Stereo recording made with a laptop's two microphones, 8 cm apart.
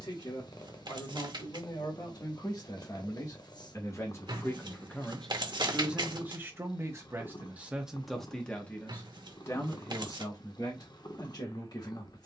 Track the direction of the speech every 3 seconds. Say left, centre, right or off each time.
left, left, centre, left.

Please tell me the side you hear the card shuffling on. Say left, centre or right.
right.